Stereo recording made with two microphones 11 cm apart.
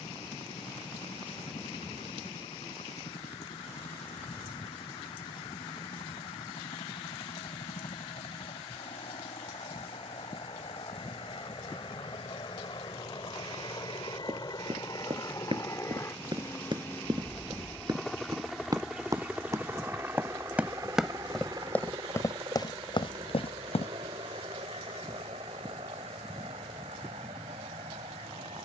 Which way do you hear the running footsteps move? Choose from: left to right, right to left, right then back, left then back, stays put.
right to left.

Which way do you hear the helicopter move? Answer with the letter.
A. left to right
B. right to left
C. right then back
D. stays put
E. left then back
A.